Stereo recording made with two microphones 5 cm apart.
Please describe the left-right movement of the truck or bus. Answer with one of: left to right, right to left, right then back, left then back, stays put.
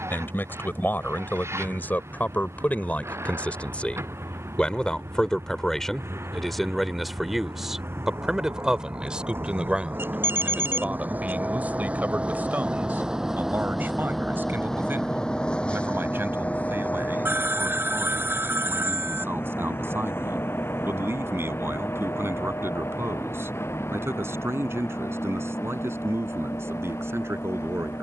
right to left.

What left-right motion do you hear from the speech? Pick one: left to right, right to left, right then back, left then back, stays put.
left to right.